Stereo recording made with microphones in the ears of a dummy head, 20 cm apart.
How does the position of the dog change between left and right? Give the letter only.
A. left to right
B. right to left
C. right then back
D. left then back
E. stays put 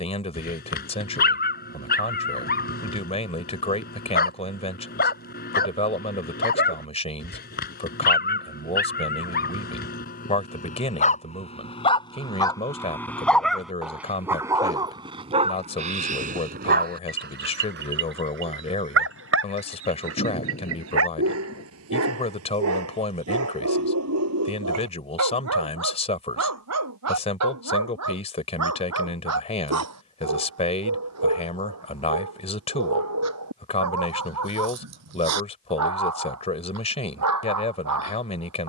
A.